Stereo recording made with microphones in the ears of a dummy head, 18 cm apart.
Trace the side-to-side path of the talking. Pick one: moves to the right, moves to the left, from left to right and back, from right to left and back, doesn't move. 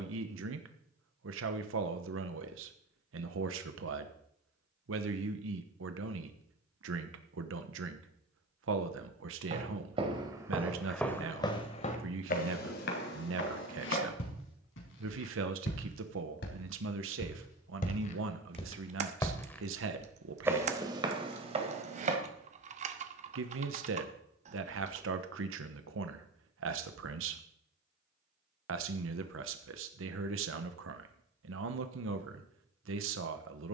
doesn't move.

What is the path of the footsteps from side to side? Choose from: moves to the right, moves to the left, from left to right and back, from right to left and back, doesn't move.
from right to left and back.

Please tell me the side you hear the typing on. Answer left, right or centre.
right.